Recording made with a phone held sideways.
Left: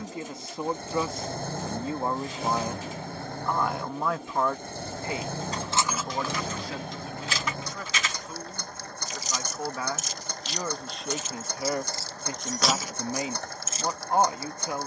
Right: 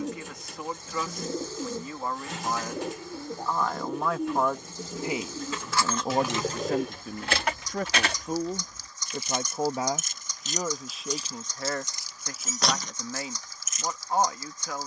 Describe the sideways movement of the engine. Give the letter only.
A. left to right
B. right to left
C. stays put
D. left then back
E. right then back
C.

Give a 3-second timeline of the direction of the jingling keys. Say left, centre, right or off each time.
off, left, right, right, centre.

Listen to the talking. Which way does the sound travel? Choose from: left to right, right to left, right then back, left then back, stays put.
right then back.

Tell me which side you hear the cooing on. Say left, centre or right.
right.